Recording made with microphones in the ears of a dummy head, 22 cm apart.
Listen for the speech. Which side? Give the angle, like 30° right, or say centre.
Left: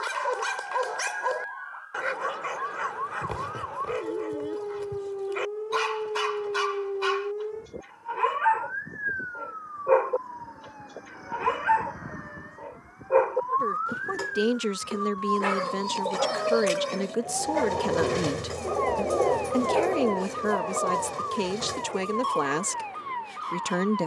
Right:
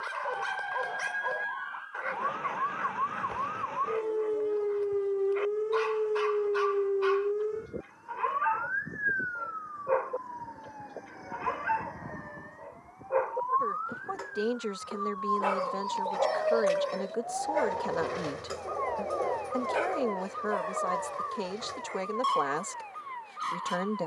40° left.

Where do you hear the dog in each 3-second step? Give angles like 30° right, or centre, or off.
70° left, 70° left, 70° left, 70° left, 60° left, 10° left, 20° right, 30° right.